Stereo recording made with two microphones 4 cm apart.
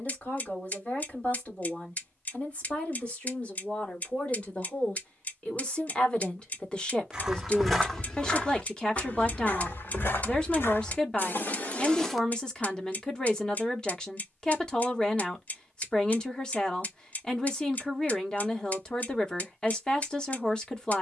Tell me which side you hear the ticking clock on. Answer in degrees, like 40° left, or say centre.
40° left.